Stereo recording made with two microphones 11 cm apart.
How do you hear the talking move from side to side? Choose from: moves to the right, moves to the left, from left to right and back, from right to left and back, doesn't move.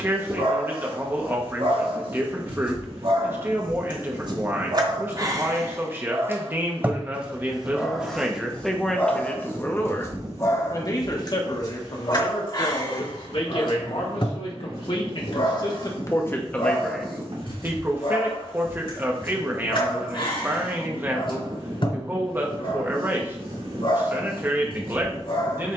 from right to left and back.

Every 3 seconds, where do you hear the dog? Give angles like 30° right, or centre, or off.
60° right, 40° right, centre, 30° left, 50° left, 60° left, 60° left, 60° left, 60° left.